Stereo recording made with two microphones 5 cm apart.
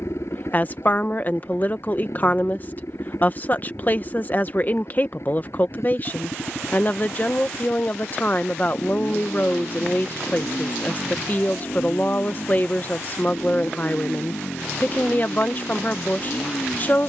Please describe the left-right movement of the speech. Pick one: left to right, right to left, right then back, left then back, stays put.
stays put.